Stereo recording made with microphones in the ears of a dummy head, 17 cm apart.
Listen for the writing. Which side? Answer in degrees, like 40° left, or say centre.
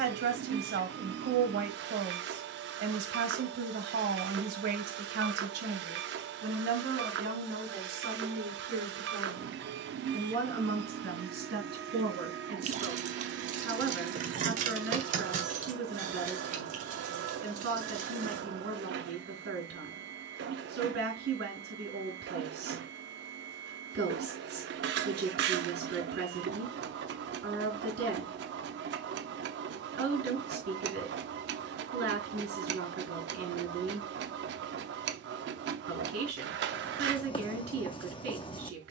30° left.